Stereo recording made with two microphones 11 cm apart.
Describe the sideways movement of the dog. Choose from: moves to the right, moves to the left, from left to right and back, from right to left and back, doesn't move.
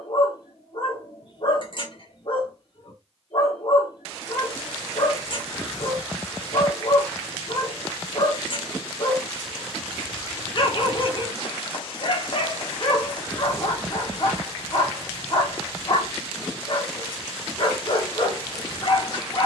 doesn't move.